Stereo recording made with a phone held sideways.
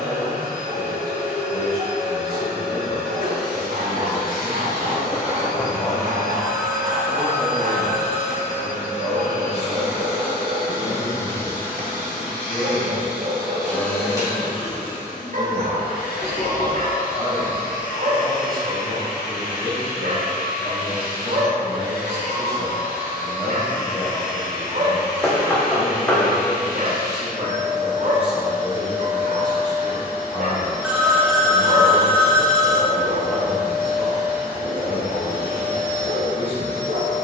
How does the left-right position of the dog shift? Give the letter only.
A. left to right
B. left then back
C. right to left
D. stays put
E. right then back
D.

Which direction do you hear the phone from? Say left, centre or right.
centre.